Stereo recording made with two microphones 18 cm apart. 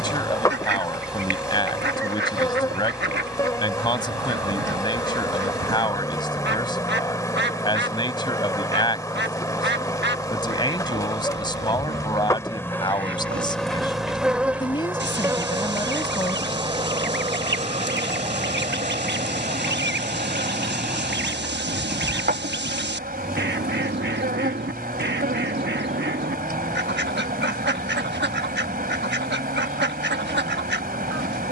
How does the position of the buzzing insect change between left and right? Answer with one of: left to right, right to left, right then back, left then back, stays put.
left to right.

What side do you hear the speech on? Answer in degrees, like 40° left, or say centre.
20° left.